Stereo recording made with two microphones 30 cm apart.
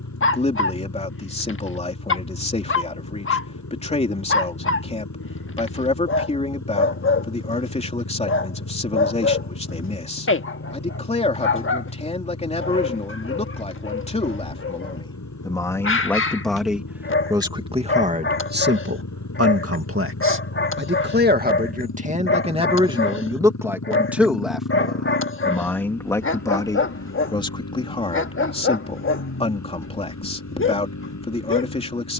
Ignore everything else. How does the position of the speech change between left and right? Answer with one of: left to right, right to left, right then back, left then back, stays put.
right then back.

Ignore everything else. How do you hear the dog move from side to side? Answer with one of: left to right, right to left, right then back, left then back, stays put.
stays put.